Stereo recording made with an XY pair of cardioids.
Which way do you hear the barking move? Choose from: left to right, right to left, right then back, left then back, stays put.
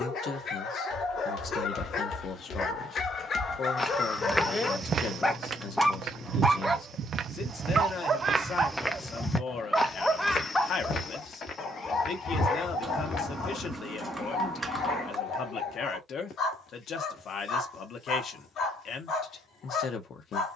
right then back.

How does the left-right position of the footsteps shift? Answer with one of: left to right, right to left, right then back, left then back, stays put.
right then back.